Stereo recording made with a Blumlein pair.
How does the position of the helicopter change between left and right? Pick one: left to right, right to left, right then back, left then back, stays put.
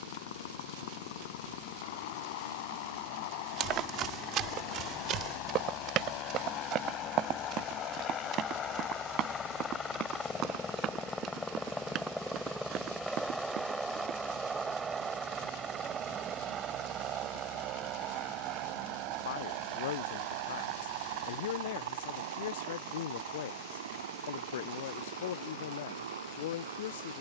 left to right.